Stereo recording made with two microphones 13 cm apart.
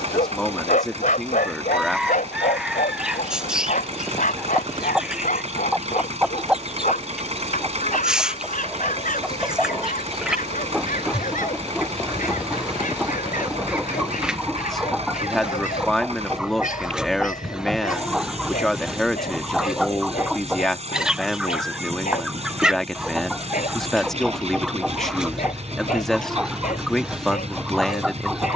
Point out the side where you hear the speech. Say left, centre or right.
centre.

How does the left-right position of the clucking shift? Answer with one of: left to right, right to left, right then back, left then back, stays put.
stays put.